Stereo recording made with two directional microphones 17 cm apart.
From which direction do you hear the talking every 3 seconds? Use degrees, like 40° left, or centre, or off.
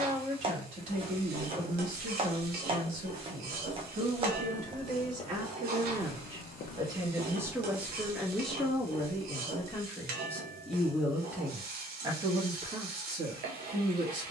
50° right, 50° right, 10° right, 10° left, 40° right.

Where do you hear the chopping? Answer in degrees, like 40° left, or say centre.
30° right.